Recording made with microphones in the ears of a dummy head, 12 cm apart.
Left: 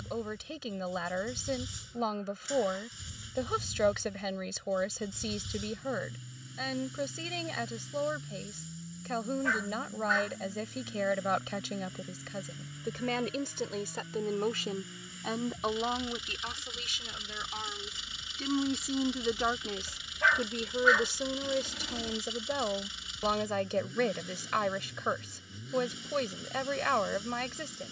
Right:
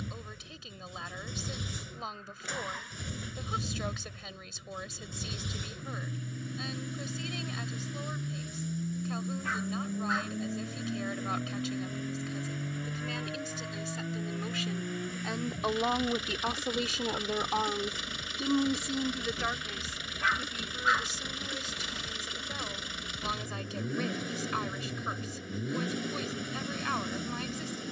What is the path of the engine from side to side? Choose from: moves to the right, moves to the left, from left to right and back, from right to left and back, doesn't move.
doesn't move.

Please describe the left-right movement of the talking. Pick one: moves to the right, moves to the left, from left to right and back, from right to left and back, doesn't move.
from left to right and back.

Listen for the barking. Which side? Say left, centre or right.
left.